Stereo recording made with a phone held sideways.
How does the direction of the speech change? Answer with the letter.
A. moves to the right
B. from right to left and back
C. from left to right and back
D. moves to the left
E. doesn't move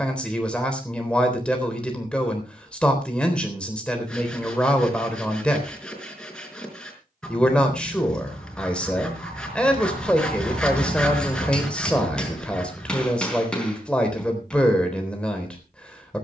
E.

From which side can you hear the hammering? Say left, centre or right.
centre.